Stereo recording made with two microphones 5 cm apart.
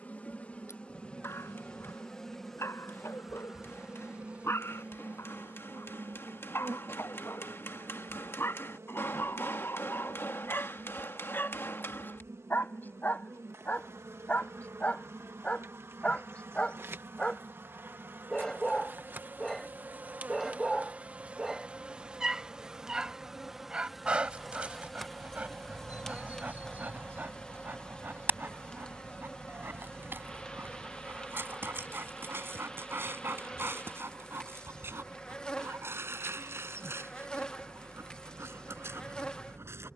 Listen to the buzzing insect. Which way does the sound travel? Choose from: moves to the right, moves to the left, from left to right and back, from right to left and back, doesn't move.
from left to right and back.